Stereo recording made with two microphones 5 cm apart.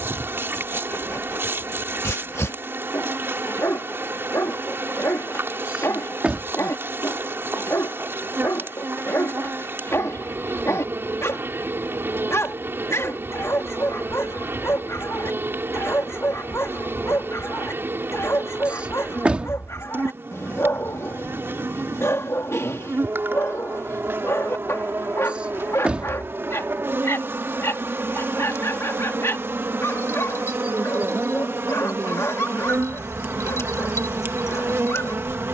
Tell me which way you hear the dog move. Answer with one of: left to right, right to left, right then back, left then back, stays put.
stays put.